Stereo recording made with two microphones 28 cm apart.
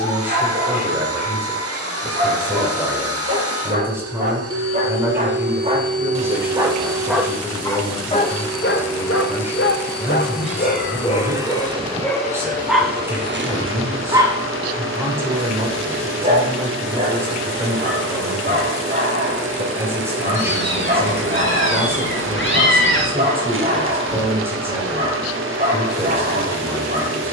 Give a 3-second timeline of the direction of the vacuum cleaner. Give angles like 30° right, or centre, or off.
50° right, 50° right, 10° right, centre, 40° right, 50° right, 50° right, 50° right, 50° right.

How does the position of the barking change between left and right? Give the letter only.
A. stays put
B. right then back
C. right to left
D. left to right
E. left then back
E.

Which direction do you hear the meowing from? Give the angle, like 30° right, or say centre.
50° left.